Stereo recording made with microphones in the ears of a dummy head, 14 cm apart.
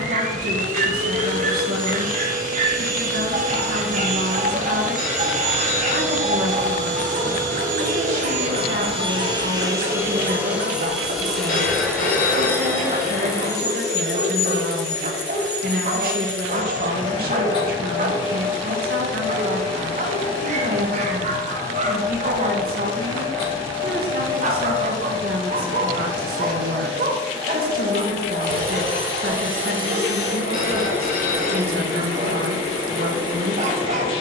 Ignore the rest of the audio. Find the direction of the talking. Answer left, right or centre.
right.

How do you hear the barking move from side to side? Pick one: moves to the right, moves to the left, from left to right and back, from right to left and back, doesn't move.
doesn't move.